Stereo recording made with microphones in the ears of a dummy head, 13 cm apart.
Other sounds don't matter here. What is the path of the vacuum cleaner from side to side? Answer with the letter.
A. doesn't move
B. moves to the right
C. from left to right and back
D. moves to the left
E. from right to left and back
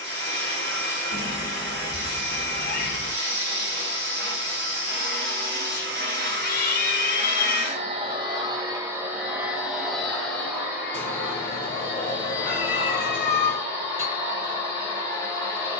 D.